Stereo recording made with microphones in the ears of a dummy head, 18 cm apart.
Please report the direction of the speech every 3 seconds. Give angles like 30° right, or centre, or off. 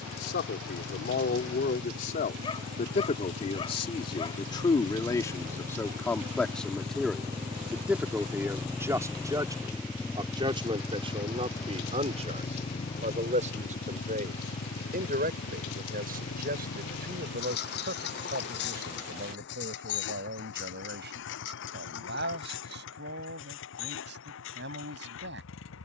50° left, 20° left, centre, 20° right, 40° right, 50° right, 50° right, 60° right, 60° right.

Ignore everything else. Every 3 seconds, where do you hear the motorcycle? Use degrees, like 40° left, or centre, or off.
60° right, 40° right, 20° right, 10° left, 30° left, 50° left, 60° left, 70° left, 70° left.